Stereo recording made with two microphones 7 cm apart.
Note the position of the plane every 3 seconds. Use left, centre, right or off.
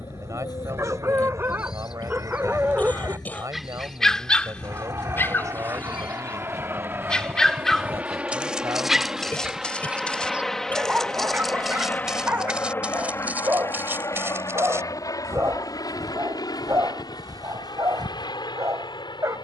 right, right, right, centre, left, left, left.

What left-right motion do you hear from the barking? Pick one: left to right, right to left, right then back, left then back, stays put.
left then back.